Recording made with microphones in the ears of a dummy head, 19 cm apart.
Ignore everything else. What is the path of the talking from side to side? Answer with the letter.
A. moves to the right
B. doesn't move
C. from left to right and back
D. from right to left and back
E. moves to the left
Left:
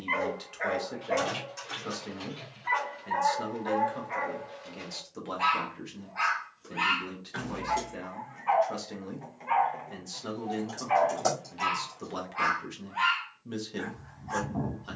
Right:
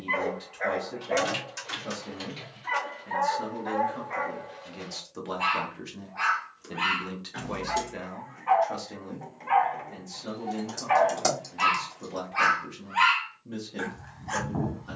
C.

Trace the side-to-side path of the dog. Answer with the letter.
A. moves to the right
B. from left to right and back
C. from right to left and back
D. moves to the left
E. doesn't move
A.